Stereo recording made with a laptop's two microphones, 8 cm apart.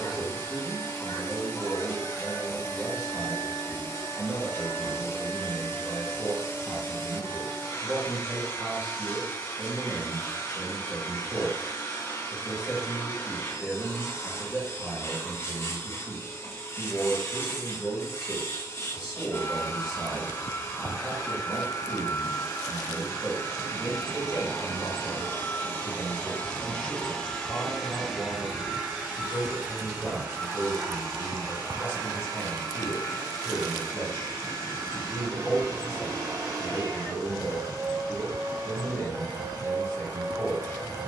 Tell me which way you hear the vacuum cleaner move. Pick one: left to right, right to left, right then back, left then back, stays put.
left to right.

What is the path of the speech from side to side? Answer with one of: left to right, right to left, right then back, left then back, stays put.
right to left.